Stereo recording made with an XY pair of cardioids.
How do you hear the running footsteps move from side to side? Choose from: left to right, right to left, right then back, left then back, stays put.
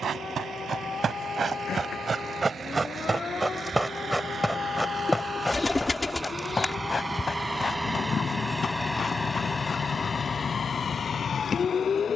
right to left.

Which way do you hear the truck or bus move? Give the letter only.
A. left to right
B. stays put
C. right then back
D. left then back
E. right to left
E.